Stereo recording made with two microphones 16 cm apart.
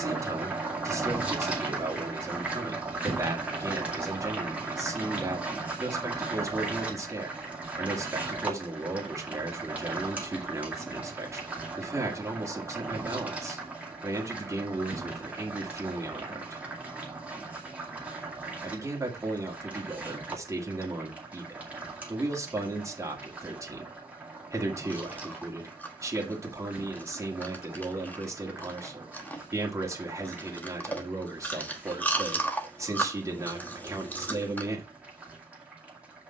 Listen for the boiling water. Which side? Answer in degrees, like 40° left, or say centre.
10° right.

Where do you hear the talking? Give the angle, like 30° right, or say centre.
20° right.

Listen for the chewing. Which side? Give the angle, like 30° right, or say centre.
10° left.